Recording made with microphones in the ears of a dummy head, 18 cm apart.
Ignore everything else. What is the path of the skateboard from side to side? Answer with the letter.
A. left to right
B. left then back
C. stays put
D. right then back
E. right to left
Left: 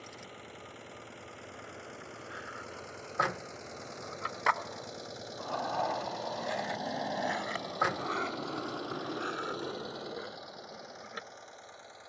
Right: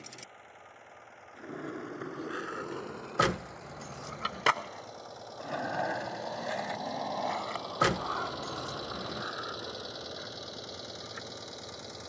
E.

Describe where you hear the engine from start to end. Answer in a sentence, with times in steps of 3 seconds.
In this clip you hear the engine on the left from 0 s, in the centre from 6 s and on the right from 9 s.